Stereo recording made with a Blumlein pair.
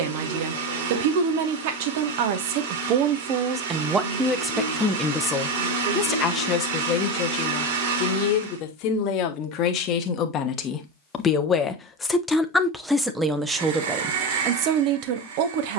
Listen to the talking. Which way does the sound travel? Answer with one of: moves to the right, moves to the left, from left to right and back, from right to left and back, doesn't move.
from right to left and back.